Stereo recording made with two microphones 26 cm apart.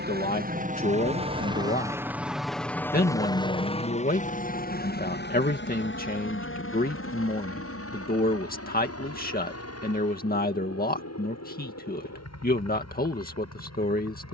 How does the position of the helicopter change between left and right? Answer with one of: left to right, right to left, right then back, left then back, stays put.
right to left.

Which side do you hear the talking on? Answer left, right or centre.
left.